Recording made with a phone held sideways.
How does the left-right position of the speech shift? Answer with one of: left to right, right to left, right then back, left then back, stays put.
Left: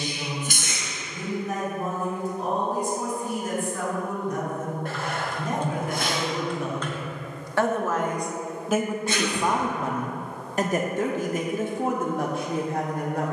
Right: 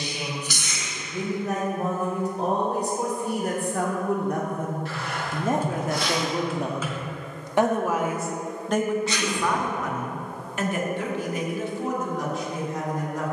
right to left.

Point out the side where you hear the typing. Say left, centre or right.
centre.